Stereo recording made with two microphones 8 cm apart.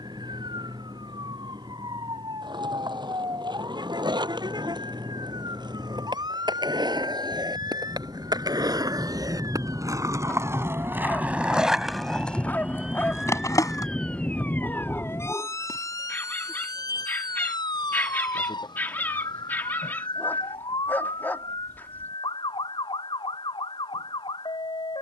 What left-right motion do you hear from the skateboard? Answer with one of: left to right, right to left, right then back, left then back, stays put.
right to left.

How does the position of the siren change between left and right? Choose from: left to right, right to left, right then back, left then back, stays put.
right to left.